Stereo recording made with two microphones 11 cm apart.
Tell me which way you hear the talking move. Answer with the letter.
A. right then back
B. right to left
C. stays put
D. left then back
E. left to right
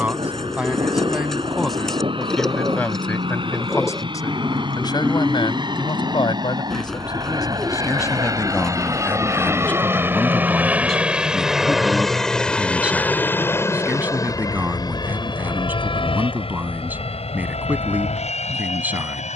D.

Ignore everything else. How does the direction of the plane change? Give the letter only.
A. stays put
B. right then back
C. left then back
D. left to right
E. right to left
E.